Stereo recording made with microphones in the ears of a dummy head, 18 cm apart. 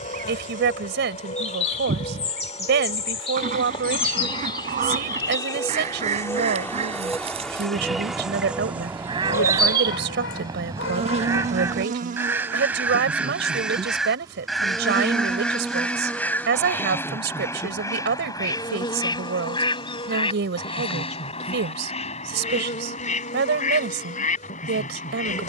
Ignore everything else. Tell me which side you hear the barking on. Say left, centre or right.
left.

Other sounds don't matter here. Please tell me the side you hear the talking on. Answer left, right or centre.
right.